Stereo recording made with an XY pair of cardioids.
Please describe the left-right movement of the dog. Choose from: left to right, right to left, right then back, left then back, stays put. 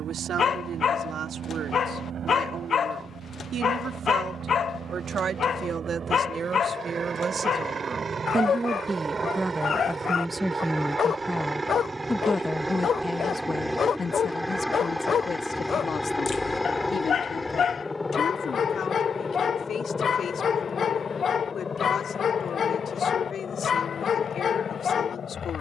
stays put.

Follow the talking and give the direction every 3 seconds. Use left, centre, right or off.
right, right, right, centre, left, left, left, left, left.